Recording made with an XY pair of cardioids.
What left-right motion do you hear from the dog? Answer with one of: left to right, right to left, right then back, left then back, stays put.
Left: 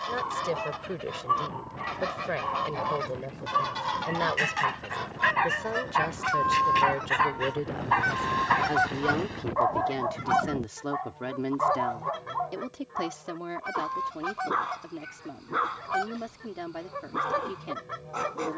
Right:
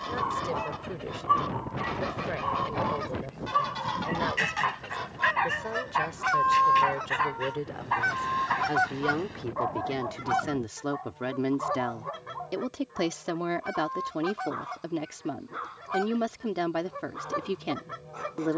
right to left.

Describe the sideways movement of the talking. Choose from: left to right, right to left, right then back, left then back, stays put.
left to right.